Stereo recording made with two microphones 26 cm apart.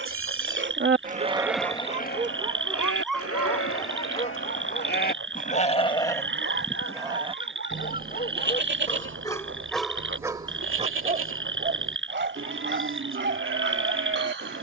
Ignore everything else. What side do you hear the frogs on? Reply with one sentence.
In this clip you hear the frogs on the right.